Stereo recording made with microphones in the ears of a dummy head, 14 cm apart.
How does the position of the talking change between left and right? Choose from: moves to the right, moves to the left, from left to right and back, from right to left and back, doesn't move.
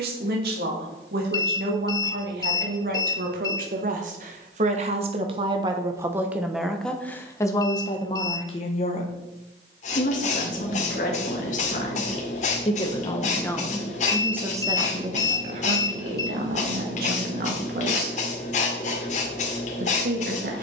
from right to left and back.